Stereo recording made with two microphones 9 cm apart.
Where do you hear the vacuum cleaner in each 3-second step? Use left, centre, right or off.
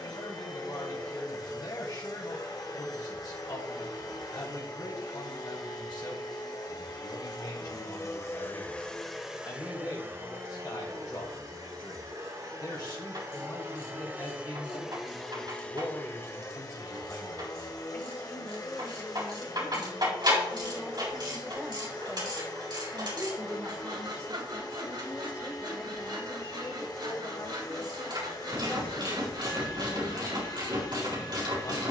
left, left, left, right, right, left, left, left, left, left, left.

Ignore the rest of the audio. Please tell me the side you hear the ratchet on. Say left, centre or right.
right.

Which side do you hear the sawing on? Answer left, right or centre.
right.